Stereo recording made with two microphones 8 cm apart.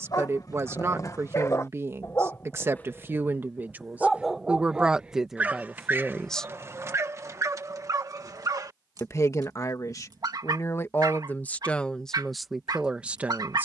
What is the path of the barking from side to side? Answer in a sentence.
In this clip you hear the barking travel towards the right.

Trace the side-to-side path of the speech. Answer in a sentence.
You can hear the speech go left and come back.